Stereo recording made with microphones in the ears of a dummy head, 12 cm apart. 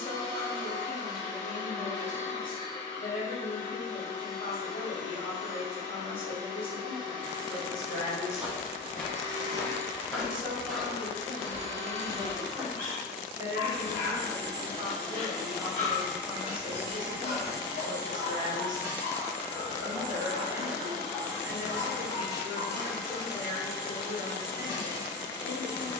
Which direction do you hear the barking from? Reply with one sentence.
In this clip you hear the barking on the left.